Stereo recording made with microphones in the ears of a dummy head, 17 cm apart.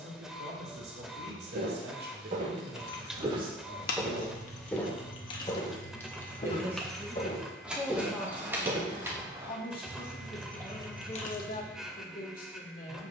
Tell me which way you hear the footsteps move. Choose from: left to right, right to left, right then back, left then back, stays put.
left then back.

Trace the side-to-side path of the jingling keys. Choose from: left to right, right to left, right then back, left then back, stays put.
right then back.